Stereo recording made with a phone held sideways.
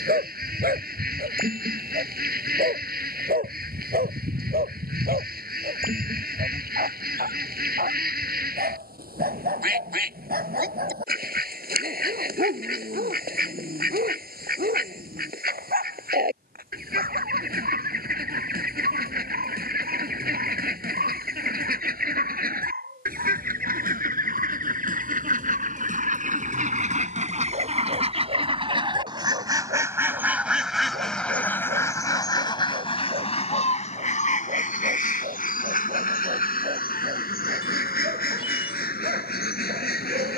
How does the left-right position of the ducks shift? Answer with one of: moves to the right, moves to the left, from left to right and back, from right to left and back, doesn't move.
moves to the left.